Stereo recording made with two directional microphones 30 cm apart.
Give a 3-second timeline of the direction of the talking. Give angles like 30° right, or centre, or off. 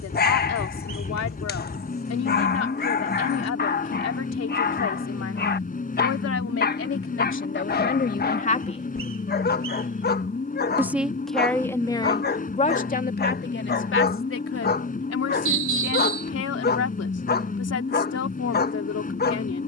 50° left, 50° left, 40° left, centre, 30° left, 50° left, 50° left.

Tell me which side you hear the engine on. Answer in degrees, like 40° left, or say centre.
30° left.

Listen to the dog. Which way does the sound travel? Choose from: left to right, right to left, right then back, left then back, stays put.
stays put.